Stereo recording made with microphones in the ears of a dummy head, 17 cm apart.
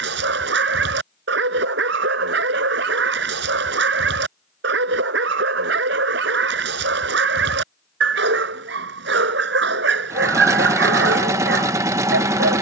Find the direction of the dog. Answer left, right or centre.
right.